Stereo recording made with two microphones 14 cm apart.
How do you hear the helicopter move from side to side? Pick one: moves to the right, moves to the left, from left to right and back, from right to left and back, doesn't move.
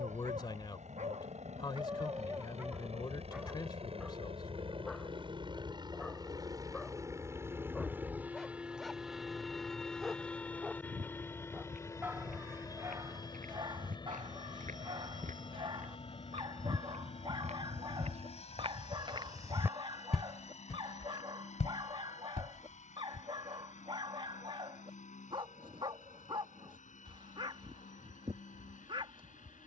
moves to the left.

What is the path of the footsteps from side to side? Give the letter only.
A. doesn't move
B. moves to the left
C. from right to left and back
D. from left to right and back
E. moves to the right
B.